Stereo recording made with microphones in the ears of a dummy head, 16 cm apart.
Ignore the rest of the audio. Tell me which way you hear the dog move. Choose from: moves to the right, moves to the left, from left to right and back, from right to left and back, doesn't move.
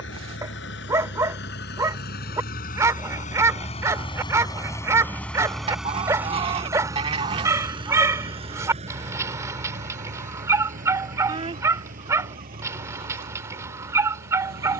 doesn't move.